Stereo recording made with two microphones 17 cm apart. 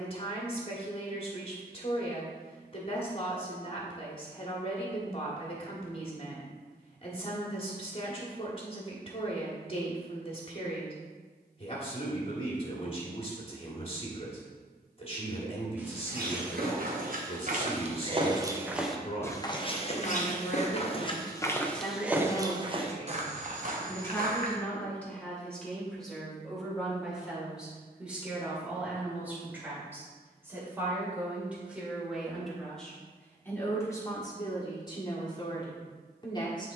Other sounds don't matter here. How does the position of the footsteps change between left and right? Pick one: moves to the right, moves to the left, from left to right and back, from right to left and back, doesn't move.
from right to left and back.